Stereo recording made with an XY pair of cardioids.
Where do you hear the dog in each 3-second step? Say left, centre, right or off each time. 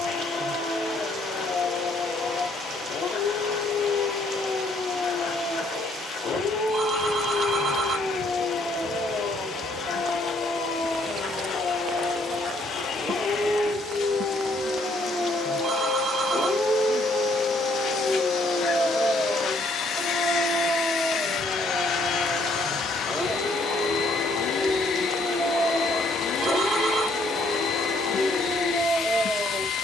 left, left, left, left, left, centre, centre, centre, centre, centre.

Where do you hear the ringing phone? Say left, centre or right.
right.